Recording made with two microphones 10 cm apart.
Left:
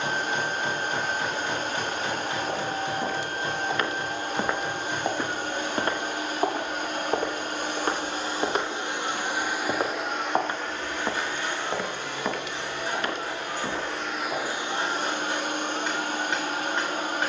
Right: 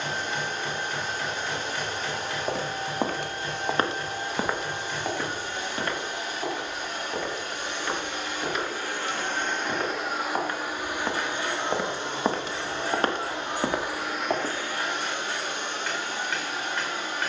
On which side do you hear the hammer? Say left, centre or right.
left.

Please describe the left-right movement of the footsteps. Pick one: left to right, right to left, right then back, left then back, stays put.
left then back.